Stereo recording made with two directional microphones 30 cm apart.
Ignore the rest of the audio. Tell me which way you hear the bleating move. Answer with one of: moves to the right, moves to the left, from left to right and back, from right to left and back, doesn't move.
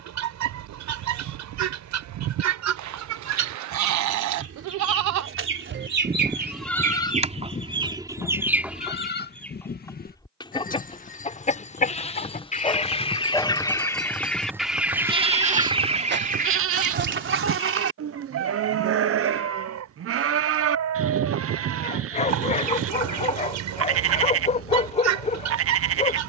from right to left and back.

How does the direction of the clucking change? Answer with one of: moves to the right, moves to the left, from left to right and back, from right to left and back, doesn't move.
from right to left and back.